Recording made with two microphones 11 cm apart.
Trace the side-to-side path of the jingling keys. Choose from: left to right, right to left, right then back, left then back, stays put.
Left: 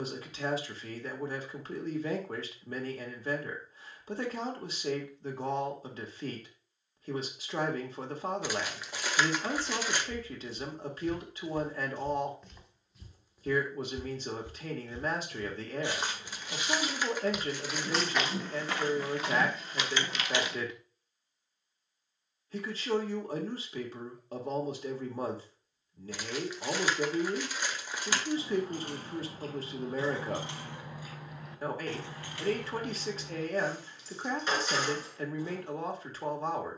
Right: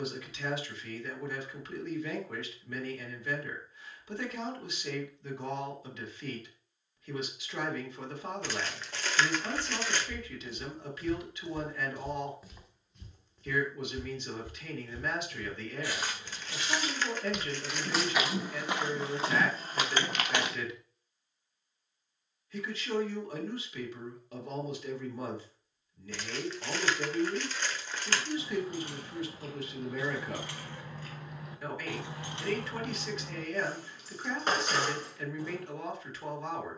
left to right.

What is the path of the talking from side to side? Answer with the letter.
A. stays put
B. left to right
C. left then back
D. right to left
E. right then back
A.